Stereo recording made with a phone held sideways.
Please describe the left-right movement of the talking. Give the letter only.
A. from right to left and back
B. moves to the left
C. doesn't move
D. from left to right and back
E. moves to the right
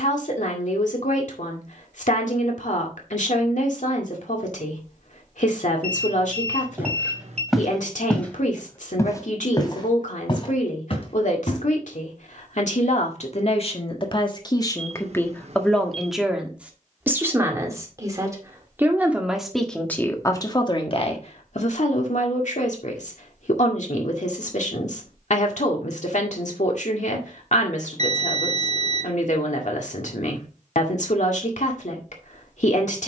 D.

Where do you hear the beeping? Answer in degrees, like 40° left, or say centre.
60° right.